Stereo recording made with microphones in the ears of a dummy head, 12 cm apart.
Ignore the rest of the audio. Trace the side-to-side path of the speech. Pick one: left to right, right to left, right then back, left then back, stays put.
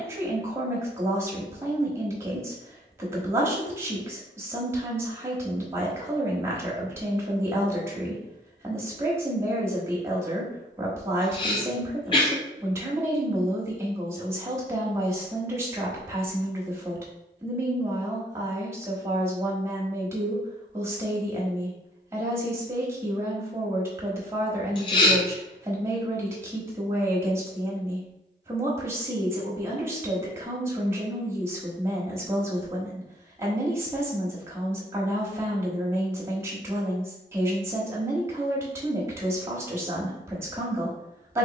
stays put.